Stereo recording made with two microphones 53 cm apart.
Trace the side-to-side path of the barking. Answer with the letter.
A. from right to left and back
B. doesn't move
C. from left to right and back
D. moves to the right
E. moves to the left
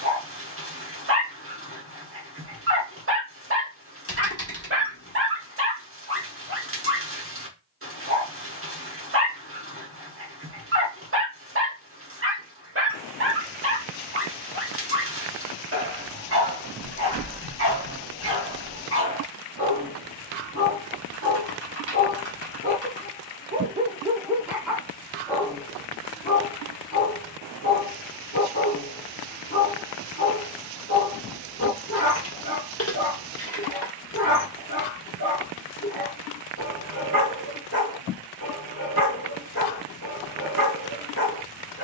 E.